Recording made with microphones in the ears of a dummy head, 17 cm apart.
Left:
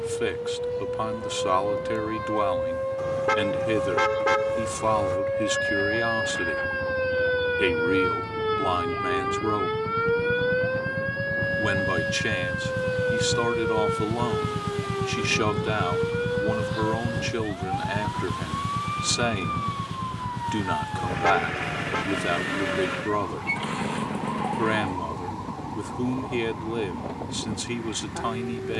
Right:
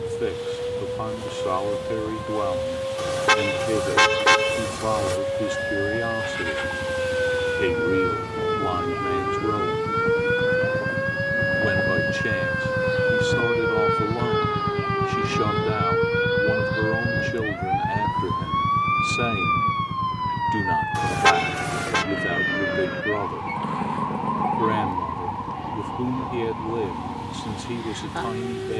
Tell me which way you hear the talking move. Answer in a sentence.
In this clip you hear the talking stay in one place.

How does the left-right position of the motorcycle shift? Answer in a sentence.
You can hear the motorcycle move from right to left.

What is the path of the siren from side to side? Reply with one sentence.
In this clip you hear the siren travel towards the right.